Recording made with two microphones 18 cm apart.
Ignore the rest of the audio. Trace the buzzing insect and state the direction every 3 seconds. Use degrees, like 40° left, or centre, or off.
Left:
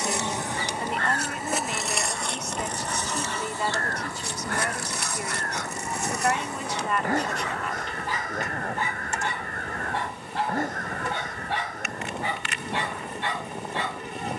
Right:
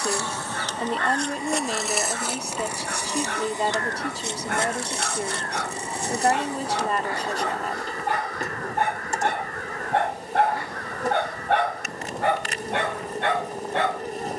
centre, 20° right, 40° right, 40° right, 40° right.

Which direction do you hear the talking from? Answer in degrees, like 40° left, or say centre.
30° right.